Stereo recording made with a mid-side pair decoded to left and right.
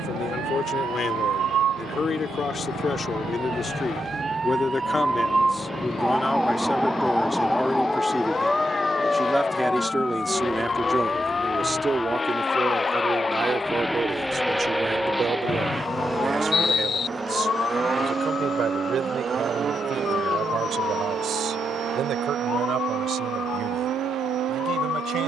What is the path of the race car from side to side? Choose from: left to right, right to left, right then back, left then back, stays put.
left to right.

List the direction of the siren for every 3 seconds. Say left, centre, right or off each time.
right, right, centre, left, left, left, left, left, left.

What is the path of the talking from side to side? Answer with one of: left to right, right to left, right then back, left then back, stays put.
left to right.